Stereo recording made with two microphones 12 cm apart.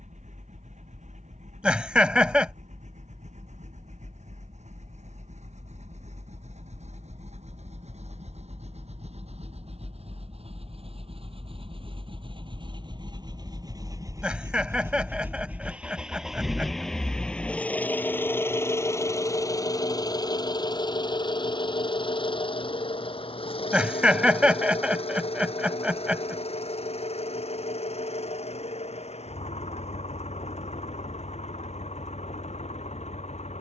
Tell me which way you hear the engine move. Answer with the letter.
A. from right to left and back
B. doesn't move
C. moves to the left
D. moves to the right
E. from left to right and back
C.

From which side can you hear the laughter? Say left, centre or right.
centre.